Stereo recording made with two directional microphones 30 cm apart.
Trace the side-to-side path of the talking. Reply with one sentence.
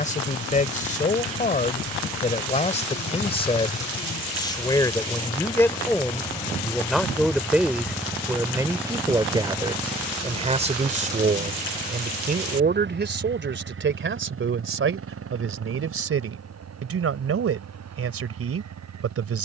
You can hear the talking move from left to right.